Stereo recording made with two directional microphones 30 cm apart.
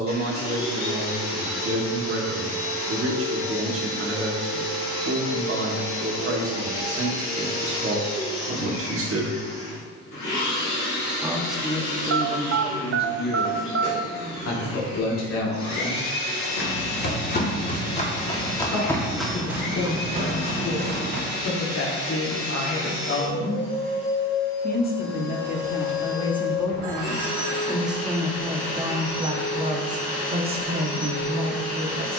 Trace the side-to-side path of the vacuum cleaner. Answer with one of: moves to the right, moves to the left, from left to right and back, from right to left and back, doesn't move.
doesn't move.